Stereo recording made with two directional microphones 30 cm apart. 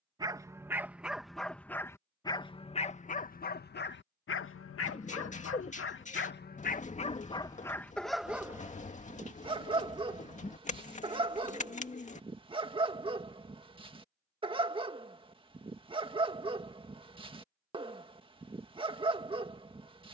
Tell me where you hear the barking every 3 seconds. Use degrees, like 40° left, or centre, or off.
centre, 40° left, 10° left, 20° right, 20° right, 20° right, 20° right.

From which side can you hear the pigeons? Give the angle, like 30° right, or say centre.
20° left.